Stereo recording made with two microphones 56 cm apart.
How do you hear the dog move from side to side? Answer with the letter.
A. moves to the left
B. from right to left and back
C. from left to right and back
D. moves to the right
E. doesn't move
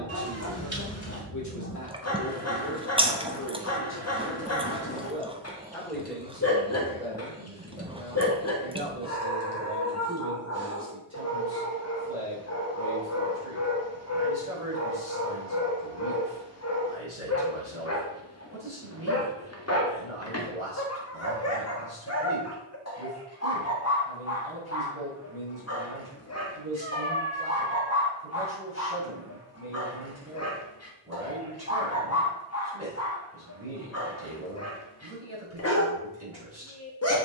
E.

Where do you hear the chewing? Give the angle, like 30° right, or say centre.
10° right.